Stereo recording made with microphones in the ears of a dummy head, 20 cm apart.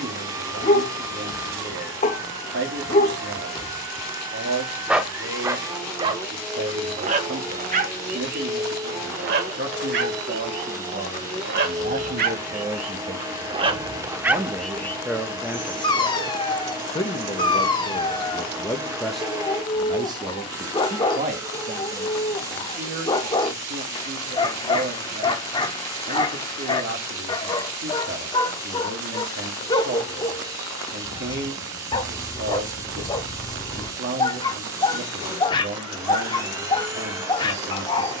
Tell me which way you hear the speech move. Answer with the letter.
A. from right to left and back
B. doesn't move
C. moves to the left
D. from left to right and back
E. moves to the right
A.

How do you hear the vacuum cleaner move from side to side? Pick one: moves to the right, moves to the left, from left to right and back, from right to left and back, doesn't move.
doesn't move.